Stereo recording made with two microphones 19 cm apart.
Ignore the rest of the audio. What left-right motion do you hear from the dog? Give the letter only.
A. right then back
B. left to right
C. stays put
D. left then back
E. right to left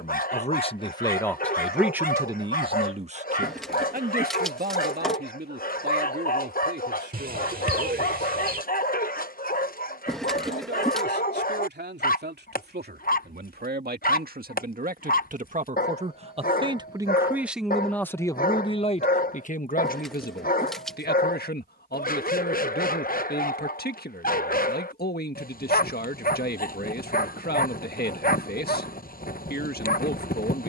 C.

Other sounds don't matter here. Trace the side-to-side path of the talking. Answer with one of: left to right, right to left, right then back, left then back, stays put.
right then back.